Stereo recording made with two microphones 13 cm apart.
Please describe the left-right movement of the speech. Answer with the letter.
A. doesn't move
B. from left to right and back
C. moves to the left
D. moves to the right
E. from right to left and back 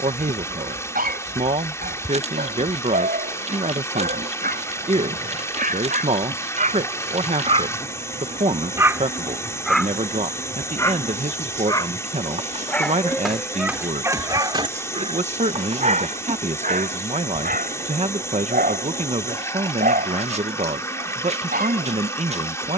A.